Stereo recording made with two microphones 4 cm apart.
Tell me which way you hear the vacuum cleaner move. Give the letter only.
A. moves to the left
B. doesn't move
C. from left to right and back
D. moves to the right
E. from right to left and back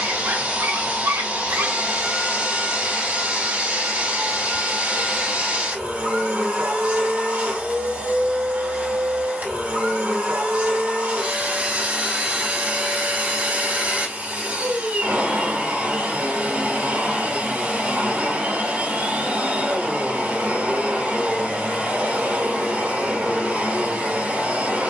B.